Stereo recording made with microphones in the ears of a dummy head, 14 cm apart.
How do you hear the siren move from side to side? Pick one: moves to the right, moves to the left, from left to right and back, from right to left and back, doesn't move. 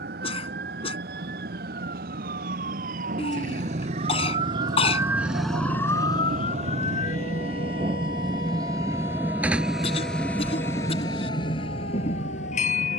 moves to the left.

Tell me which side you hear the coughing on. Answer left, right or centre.
left.